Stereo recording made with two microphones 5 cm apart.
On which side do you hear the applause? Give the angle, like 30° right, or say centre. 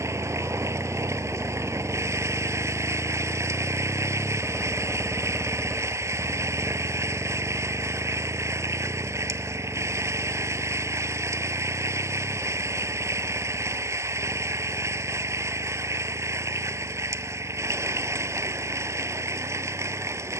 70° right.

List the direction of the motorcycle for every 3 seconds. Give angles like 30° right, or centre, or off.
30° left, centre, 30° right, 40° right, 50° right, 60° right, 60° right.